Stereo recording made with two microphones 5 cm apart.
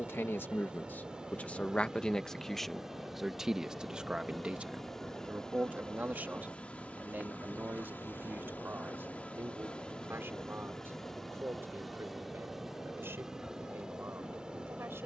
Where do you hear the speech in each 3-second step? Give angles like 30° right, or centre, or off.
30° left, 20° right, 40° right, 50° right, 60° right.